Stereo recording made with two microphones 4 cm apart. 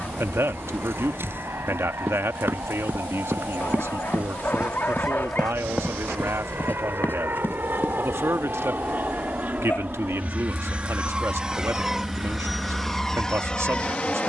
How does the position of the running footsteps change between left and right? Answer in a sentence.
You can hear the running footsteps travel towards the left.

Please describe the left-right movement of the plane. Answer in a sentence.
In this clip you hear the plane move to the left.